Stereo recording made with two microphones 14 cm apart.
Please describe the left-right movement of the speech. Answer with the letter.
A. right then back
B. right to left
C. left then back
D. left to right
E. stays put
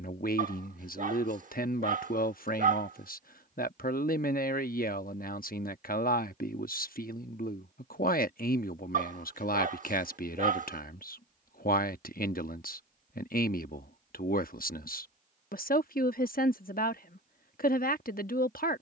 E.